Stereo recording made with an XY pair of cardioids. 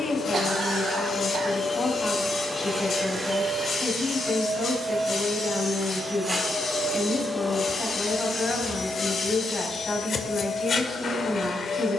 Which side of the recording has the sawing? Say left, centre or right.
left.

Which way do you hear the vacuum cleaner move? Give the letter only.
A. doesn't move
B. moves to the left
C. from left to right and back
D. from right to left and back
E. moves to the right
C.